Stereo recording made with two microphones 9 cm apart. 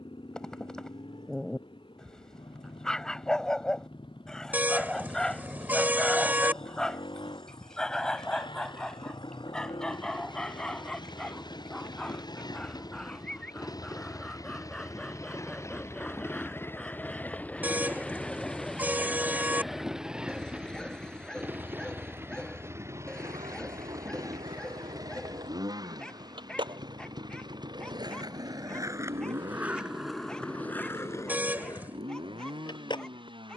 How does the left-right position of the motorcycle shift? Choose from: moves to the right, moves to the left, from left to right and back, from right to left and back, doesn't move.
moves to the right.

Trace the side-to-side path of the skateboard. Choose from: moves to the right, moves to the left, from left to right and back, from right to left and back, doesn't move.
moves to the left.